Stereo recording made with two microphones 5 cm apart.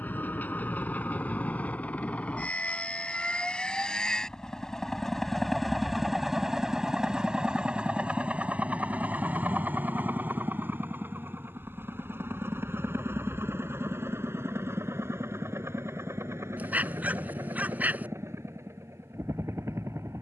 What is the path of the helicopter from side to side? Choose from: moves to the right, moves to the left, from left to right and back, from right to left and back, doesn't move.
moves to the right.